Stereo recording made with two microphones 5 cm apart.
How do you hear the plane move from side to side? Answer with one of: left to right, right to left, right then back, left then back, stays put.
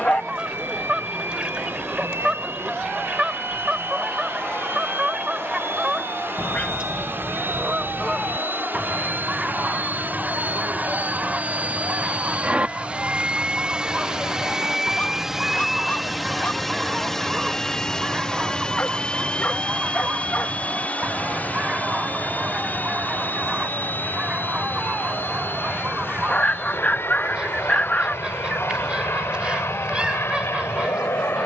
right to left.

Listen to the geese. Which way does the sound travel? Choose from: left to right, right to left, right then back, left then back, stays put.
stays put.